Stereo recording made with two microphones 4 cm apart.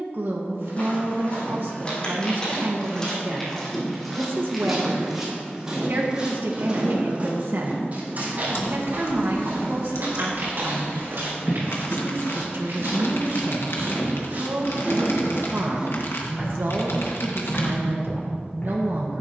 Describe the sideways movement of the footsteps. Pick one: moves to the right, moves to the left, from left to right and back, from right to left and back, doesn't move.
from left to right and back.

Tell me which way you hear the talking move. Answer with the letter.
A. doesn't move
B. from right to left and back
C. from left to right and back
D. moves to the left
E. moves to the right
A.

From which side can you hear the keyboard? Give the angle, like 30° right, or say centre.
70° left.